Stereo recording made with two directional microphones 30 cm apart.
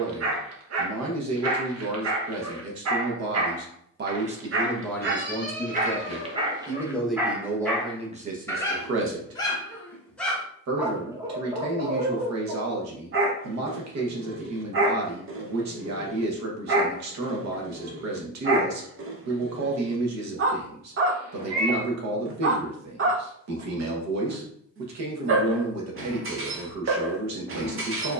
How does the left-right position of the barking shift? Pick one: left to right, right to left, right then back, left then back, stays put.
left then back.